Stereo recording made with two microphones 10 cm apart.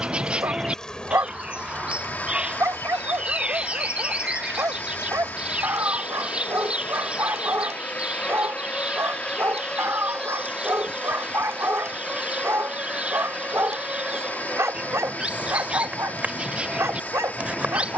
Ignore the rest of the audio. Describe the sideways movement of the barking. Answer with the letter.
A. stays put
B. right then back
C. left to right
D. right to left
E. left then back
A.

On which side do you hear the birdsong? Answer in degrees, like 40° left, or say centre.
10° right.